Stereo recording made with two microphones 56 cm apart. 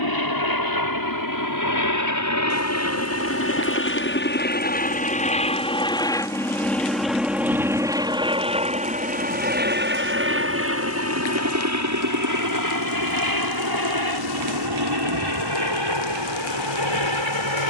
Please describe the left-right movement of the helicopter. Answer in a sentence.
You can hear the helicopter go from the left side to the right.